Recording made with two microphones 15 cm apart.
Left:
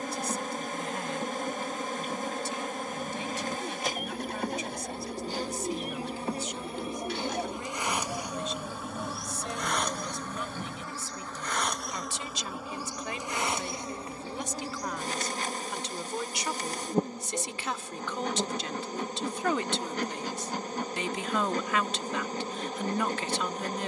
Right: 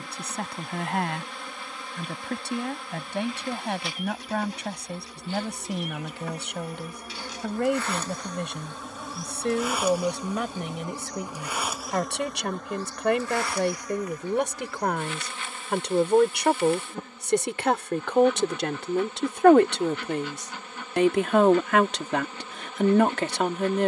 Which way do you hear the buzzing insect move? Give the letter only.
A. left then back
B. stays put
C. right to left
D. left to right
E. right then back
E.